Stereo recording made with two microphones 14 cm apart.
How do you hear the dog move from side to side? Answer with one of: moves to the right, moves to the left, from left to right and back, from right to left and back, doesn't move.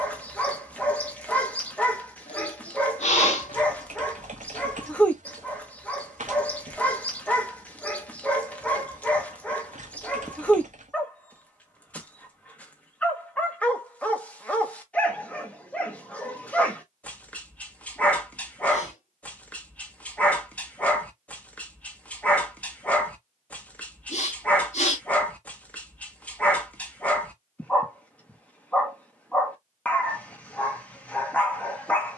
doesn't move.